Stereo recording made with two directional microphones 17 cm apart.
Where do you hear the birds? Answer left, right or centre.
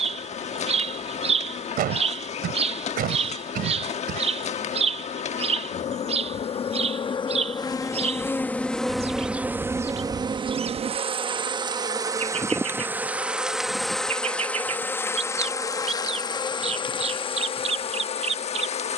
right.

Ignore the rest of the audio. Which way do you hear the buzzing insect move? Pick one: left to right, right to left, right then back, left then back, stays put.
right then back.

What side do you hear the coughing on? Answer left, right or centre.
right.